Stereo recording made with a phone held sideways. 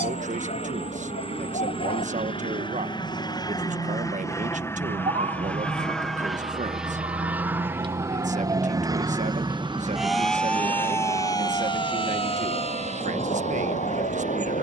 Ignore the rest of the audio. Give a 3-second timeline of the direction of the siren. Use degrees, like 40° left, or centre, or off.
70° right, 60° right, 40° right, 10° left, 50° left.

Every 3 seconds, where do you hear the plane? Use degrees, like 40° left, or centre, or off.
50° left, 20° left, 10° right, 40° right, 50° right.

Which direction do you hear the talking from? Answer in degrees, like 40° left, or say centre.
60° right.